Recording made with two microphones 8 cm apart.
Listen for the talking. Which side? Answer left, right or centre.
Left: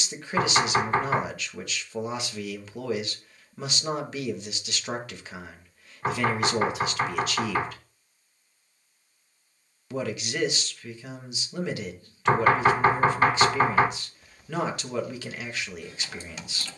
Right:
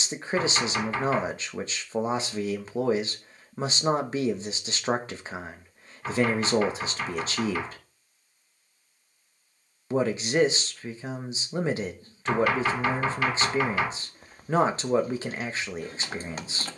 right.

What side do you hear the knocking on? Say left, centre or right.
left.